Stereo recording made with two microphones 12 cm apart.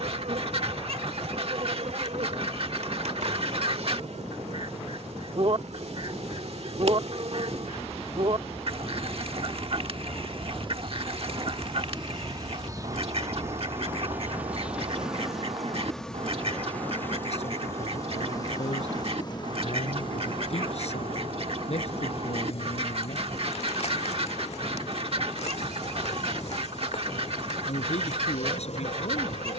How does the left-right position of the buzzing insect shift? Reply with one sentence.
In this clip you hear the buzzing insect go from the right side to the left.